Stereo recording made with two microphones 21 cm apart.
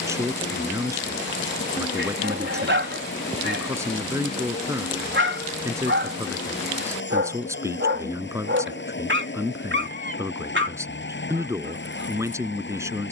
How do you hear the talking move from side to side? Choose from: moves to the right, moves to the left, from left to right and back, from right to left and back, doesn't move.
doesn't move.